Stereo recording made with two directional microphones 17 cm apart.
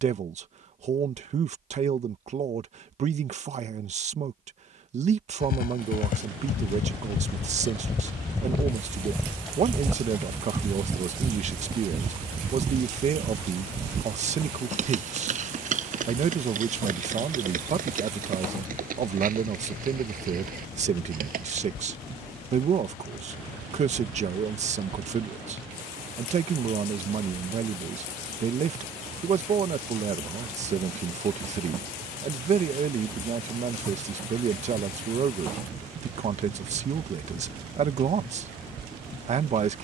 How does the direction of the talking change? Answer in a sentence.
In this clip you hear the talking stay put.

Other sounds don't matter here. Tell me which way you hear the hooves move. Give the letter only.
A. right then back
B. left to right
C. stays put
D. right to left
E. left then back
B.